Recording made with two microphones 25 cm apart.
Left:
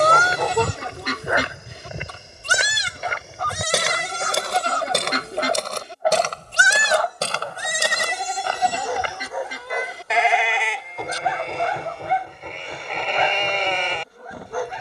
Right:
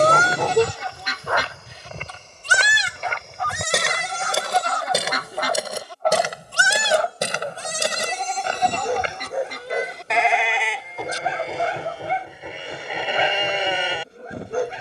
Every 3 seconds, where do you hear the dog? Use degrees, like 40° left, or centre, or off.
10° left, 40° left, 20° right, 30° right, 30° right.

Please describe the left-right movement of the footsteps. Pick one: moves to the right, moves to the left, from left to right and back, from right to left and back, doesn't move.
moves to the right.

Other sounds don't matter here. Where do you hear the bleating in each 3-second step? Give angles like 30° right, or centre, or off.
50° left, 30° left, 10° left, centre, 10° right.